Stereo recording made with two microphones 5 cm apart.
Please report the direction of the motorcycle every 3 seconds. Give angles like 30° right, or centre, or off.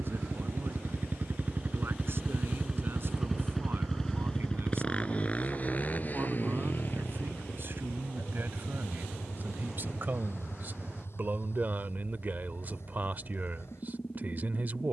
40° right, 20° left, 50° left, 60° left, 60° left.